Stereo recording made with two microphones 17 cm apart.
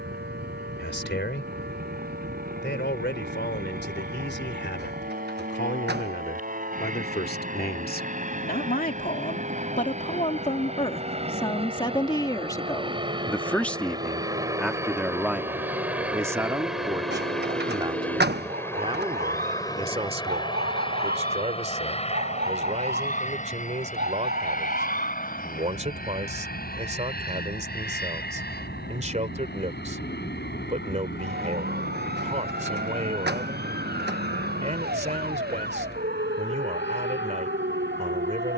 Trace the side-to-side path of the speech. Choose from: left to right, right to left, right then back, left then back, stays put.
left to right.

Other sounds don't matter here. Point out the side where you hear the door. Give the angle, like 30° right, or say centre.
70° right.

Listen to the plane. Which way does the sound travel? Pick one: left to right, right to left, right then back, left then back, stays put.
right to left.